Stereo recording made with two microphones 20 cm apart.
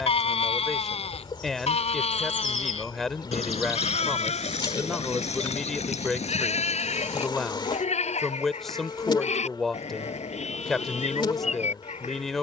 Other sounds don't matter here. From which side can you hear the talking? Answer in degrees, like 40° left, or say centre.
centre.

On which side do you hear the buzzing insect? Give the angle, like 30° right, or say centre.
20° left.